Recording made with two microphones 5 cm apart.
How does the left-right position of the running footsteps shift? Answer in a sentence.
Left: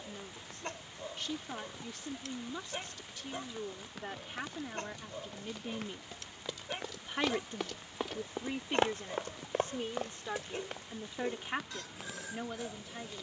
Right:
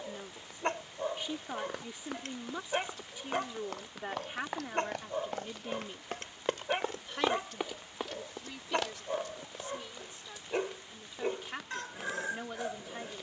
In this clip you hear the running footsteps travel towards the left.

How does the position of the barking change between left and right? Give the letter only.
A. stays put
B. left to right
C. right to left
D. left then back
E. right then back
A.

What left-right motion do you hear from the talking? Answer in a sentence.
You can hear the talking go left and come back.